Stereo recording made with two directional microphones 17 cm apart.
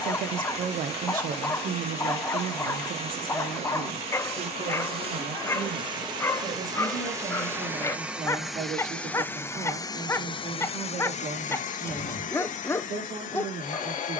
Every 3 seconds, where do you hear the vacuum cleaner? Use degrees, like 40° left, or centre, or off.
40° right, 30° right, 10° right, 30° left, 50° left.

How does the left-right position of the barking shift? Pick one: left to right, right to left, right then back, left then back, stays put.
stays put.